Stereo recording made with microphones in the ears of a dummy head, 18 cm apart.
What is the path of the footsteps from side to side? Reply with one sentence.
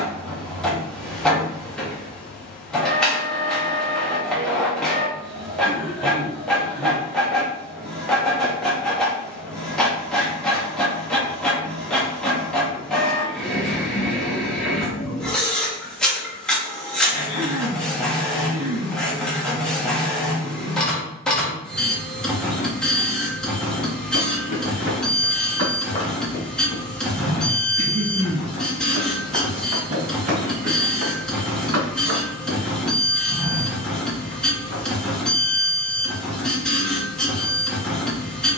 In this clip you hear the footsteps move from left to right and back again.